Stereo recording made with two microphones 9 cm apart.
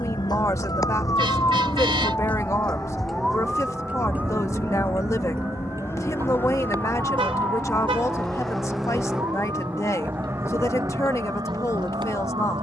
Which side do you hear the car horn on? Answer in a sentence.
In this clip you hear the car horn on the right.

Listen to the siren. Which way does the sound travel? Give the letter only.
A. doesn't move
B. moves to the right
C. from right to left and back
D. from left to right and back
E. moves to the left
B.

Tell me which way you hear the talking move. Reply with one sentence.
In this clip you hear the talking stay put.